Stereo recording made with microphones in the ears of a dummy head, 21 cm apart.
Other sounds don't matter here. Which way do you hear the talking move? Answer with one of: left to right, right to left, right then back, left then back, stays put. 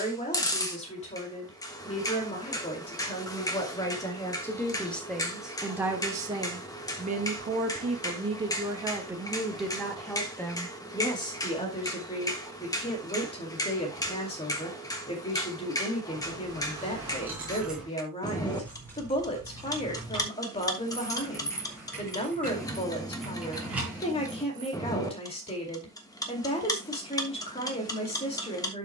right then back.